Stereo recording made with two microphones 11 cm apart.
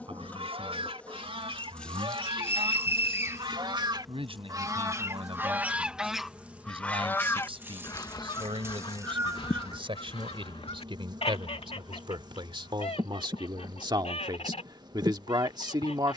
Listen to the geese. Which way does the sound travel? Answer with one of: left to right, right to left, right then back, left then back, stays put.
right to left.